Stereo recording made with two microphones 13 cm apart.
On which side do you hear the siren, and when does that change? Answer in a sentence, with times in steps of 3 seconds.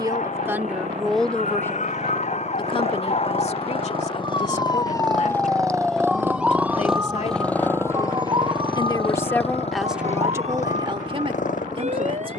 In this clip you hear the siren on the left from 0 s and on the right from 6 s.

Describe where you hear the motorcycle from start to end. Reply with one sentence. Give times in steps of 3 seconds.
In this clip you hear the motorcycle on the right from 0 s, in the centre from 6 s and on the left from 9 s.